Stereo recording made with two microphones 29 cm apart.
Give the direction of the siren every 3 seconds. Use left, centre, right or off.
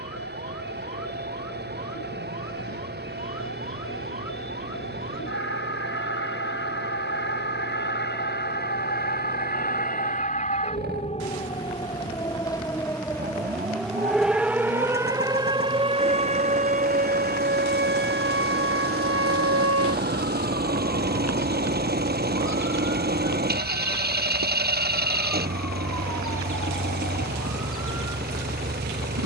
left, left, left, left, centre, right, right, right, right, right.